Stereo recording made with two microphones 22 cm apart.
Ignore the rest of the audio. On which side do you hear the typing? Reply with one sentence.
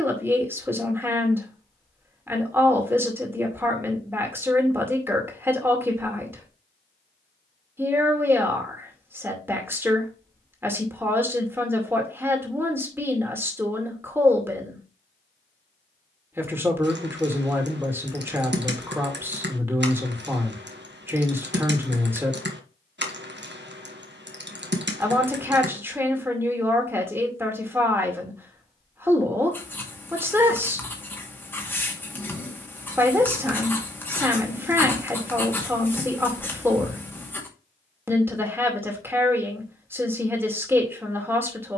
You can hear the typing on the right.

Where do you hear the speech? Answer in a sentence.
You can hear the speech in the centre.